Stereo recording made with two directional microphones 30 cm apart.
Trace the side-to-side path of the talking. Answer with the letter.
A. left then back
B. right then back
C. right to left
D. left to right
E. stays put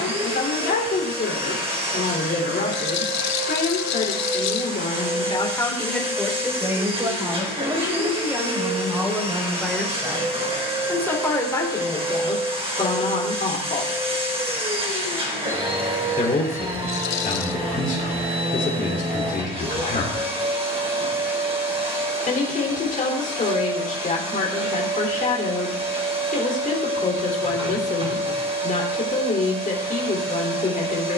B.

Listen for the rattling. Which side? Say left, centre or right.
left.